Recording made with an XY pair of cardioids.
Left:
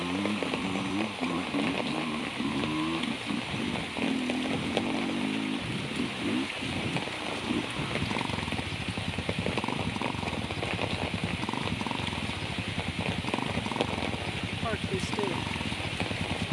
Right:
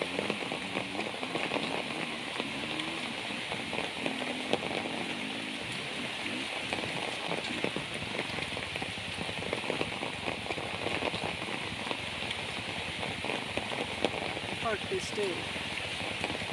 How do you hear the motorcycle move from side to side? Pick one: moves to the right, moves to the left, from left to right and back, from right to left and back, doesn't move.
doesn't move.